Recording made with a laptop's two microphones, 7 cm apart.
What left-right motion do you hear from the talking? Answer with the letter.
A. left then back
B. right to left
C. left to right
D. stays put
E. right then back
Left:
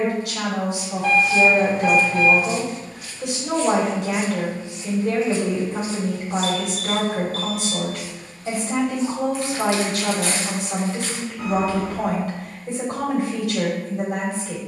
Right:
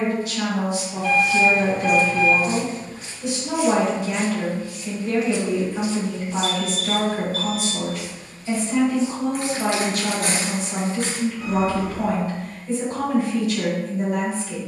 D.